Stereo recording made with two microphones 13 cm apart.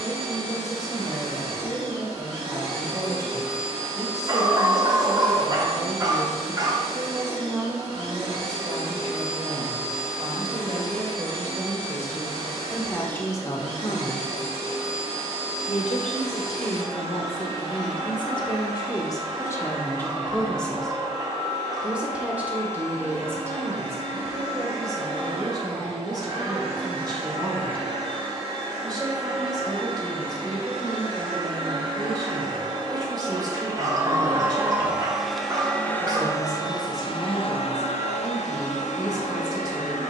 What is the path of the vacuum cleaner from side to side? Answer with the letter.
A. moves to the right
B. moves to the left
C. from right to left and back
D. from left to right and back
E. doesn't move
B.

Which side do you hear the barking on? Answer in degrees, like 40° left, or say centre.
30° right.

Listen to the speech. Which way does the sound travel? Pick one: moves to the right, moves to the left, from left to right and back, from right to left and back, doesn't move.
from right to left and back.